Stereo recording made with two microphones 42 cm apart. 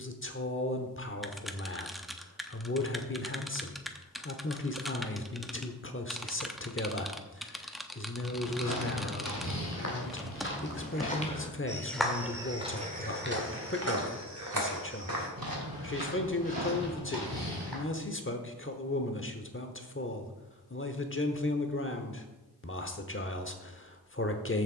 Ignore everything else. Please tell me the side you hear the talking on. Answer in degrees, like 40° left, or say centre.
30° left.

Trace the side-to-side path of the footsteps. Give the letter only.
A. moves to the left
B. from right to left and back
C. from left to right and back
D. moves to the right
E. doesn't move
D.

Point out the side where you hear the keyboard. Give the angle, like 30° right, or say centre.
centre.